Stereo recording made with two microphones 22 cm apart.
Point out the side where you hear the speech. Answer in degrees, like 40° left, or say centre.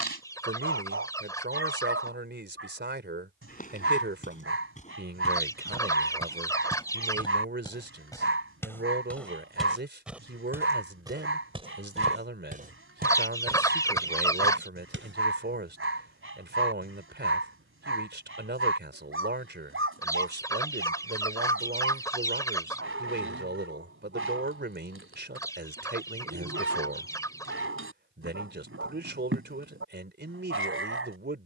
50° right.